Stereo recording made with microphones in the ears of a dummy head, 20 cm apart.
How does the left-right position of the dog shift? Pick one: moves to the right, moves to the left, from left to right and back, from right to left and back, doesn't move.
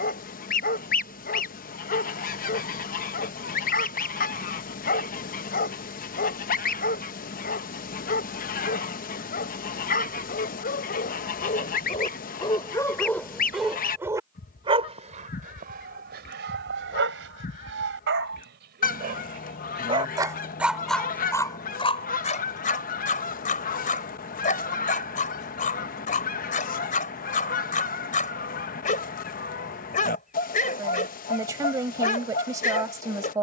from left to right and back.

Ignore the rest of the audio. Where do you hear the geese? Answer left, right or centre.
left.